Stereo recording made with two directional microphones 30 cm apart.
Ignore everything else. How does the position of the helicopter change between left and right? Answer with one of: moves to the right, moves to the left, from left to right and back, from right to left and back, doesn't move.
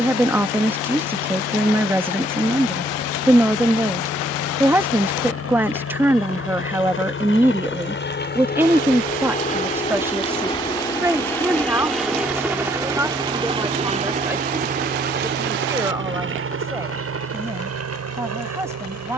moves to the right.